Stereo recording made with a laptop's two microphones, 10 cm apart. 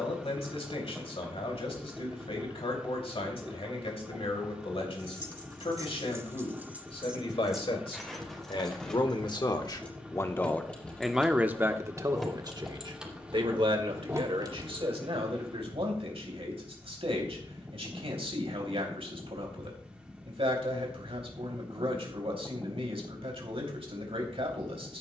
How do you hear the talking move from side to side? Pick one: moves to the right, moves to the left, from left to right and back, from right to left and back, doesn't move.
moves to the right.